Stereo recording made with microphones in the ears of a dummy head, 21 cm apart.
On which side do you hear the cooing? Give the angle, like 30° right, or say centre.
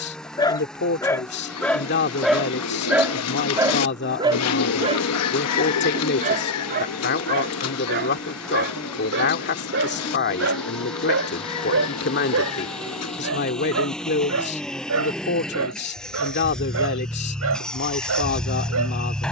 70° left.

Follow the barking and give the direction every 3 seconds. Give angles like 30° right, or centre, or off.
10° left, 20° right, 40° right, 60° right, 70° right, 70° right, 70° right.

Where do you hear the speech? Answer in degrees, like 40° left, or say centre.
50° left.